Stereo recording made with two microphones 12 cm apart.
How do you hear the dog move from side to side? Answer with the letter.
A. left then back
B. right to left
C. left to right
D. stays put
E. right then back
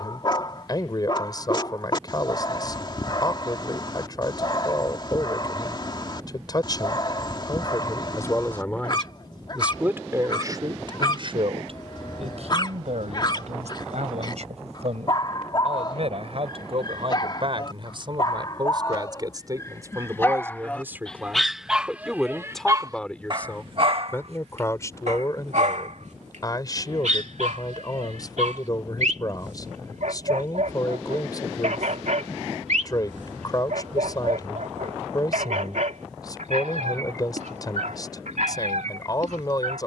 C.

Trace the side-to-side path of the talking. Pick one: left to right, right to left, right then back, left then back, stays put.
right then back.